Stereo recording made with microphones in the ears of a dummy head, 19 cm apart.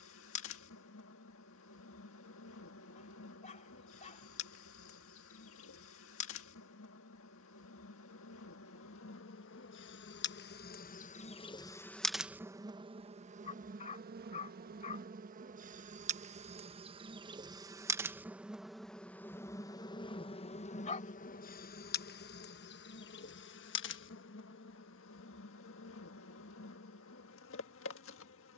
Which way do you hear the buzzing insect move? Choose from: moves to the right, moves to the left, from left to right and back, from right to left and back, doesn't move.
from left to right and back.